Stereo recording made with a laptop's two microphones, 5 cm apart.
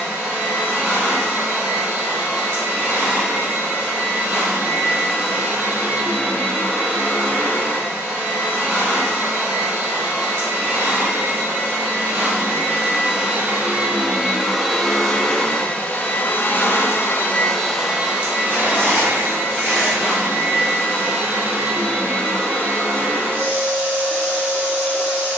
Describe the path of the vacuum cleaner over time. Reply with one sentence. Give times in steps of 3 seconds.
In this clip you hear the vacuum cleaner on the right from 0 s, on the left from 15 s and on the right from 18 s.